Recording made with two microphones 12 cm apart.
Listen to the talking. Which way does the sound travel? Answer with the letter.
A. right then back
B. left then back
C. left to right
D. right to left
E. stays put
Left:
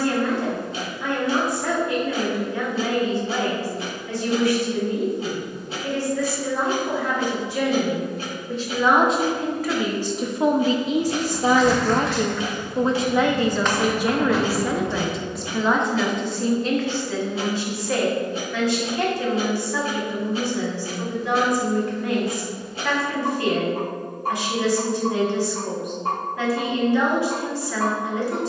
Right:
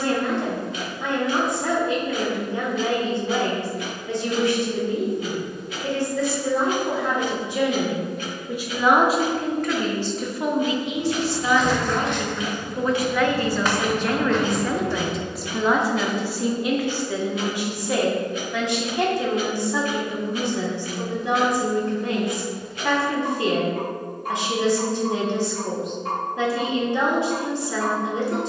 B.